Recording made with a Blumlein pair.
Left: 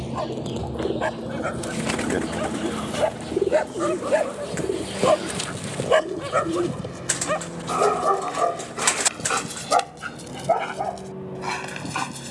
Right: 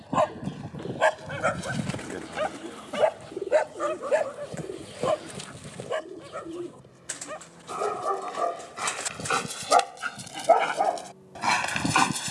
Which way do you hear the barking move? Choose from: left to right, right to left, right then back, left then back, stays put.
left then back.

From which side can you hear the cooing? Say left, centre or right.
left.